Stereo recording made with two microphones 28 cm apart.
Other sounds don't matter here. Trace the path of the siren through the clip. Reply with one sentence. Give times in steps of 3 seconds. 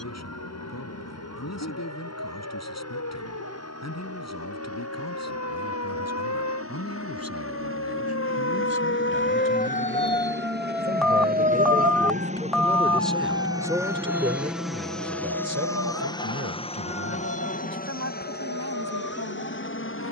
In this clip you hear the siren on the left from 0 s, in the centre from 9 s and on the right from 12 s.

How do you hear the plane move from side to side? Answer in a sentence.
You can hear the plane move from right to left.